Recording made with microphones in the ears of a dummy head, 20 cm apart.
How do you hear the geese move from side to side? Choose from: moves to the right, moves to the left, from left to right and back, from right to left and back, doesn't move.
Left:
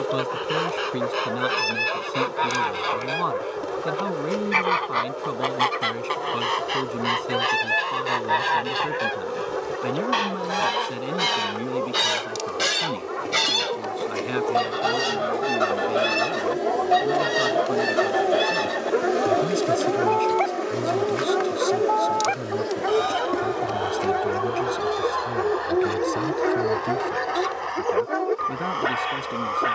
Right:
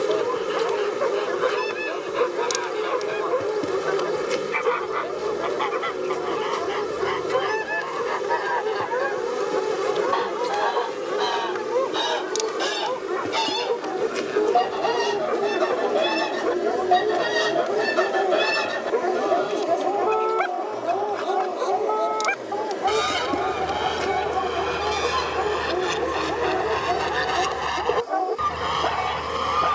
moves to the right.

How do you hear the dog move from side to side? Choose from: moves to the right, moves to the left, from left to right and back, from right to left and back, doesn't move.
moves to the left.